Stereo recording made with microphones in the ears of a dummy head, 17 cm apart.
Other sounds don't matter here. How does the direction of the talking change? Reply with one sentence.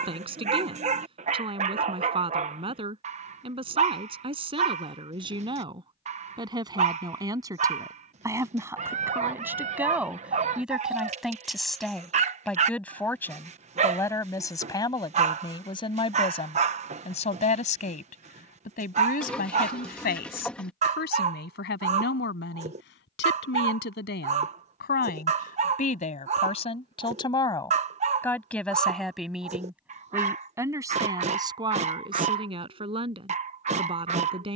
You can hear the talking go left and come back.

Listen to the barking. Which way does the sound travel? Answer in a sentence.
In this clip you hear the barking stay in one place.